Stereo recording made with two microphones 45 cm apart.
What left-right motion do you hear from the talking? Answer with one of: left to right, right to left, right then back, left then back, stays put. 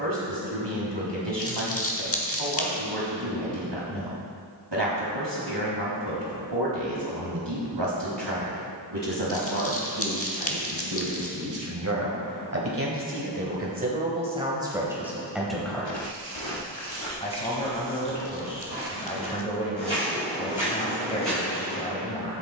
right to left.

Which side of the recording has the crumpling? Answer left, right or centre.
left.